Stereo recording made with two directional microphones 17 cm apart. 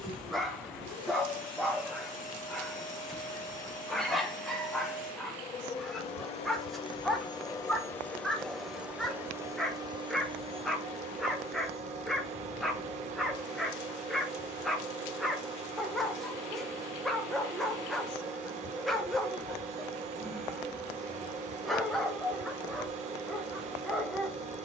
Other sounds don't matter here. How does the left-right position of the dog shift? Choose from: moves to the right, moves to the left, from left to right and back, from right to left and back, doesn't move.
doesn't move.